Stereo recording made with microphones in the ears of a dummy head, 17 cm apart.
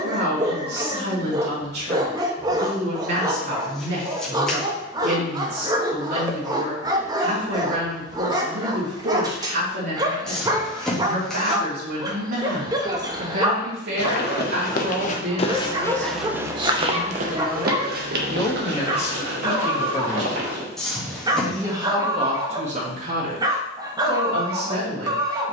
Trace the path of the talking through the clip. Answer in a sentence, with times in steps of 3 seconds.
You can hear the talking on the right from 0 s, on the left from 18 s and on the right from 21 s.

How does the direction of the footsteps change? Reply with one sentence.
You can hear the footsteps move from left to right.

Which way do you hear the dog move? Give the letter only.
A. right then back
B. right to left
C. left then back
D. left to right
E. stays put
E.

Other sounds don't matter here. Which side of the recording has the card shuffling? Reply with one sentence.
You can hear the card shuffling in the centre.